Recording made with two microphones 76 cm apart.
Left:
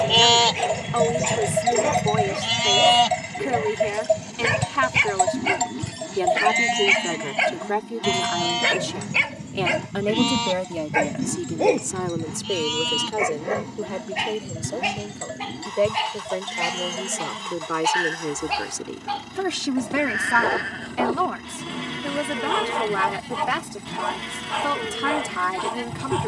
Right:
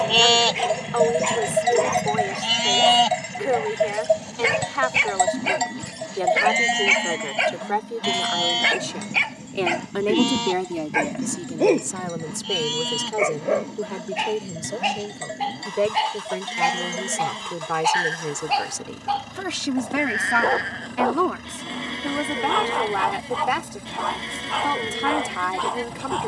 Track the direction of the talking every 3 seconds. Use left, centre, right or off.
left, left, left, centre, right, right, centre, left, left.